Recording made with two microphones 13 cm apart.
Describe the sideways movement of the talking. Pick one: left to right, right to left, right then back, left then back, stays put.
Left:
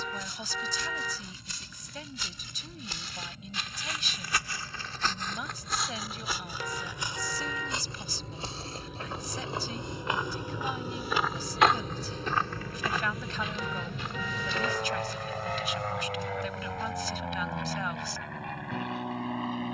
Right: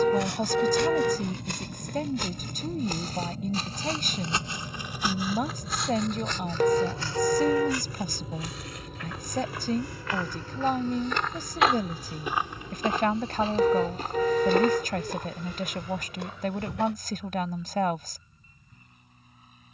stays put.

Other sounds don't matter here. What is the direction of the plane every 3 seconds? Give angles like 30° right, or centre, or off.
50° right, 40° right, 20° right, 20° left, 50° left, 60° left, 70° left.